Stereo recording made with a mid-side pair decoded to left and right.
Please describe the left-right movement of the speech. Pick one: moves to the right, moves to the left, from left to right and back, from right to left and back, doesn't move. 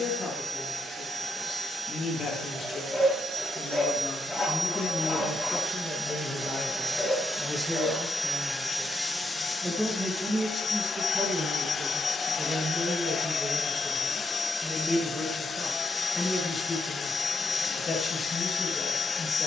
from left to right and back.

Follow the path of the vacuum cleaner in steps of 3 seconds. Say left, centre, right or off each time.
right, right, centre, left, left, left, left.